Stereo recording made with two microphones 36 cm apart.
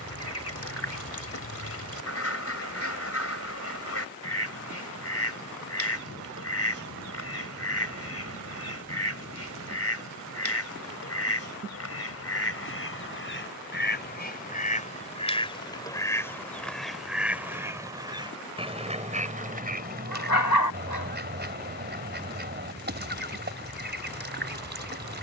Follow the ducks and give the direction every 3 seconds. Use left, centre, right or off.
left, left, left, left, left, centre, right, right, right.